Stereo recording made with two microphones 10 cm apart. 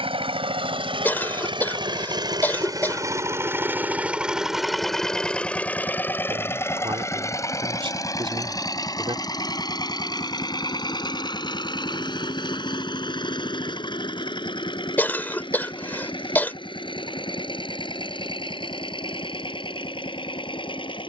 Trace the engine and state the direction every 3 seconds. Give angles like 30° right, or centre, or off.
60° right, 10° right, 30° left, 50° left, 50° left, 60° left, 60° left.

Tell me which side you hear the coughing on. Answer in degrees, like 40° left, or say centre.
20° left.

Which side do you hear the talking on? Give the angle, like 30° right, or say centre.
60° right.